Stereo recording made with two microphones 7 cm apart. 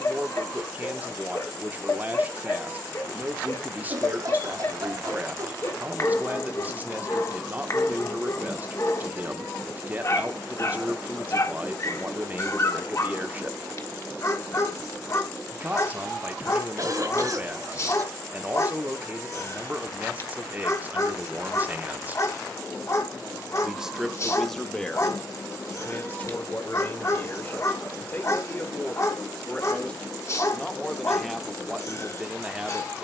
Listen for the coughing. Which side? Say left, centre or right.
right.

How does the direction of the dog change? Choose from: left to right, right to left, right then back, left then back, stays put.
stays put.